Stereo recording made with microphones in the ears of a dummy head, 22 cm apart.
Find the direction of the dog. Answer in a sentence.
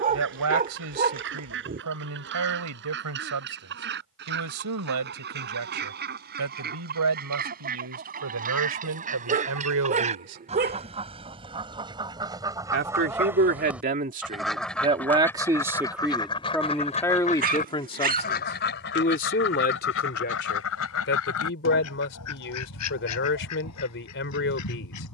In this clip you hear the dog on the right.